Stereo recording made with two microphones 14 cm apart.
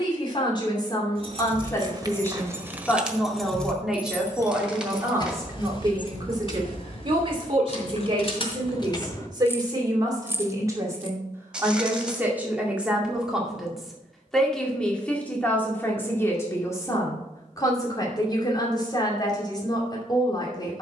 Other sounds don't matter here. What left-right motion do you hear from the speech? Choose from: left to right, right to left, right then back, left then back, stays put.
right then back.